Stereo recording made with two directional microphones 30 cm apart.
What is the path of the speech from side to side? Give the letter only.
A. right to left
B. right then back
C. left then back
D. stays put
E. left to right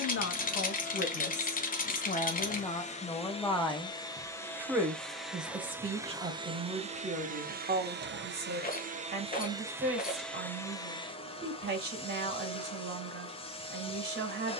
E.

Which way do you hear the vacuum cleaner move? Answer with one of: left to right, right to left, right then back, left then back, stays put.
right then back.